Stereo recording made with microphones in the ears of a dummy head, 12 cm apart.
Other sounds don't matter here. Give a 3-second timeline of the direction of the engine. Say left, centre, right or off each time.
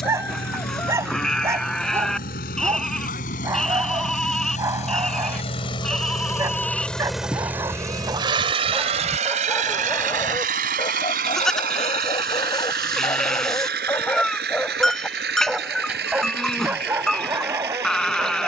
left, left, centre, right, right, right.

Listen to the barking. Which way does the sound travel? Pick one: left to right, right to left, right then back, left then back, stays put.
left then back.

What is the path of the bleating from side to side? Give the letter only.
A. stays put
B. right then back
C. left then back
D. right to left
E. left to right
A.